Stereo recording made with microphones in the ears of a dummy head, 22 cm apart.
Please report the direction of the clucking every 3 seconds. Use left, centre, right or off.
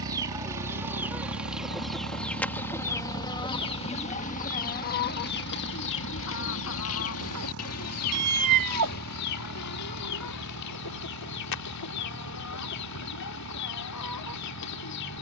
centre, left, left, left, left.